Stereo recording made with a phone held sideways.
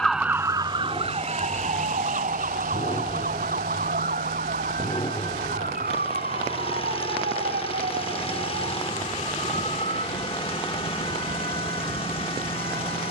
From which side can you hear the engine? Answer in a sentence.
In this clip you hear the engine on the left.